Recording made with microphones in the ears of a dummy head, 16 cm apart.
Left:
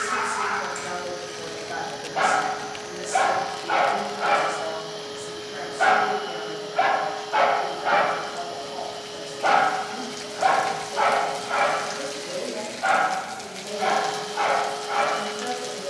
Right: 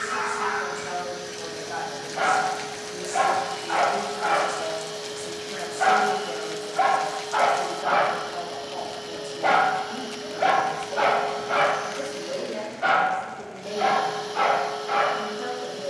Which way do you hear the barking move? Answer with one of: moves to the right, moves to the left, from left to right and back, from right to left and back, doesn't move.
moves to the right.